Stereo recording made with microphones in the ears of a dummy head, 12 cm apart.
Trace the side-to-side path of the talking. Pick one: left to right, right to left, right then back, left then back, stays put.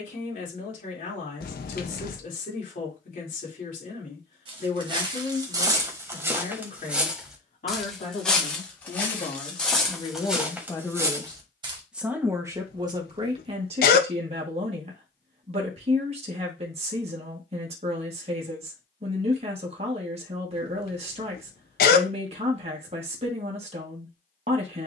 left to right.